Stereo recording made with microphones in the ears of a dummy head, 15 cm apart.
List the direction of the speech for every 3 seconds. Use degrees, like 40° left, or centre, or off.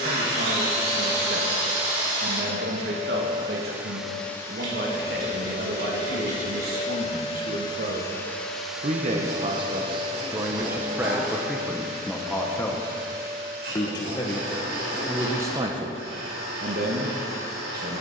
70° right, 70° right, 60° right, 20° right, 10° left, 40° right.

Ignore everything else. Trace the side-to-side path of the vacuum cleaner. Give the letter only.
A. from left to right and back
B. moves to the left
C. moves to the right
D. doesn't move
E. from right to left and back
E.